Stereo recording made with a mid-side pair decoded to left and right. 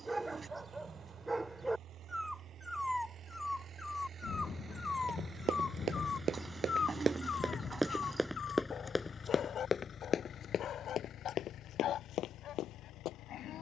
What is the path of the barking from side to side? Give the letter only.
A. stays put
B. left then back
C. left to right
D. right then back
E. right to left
E.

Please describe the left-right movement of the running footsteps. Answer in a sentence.
You can hear the running footsteps move from right to left.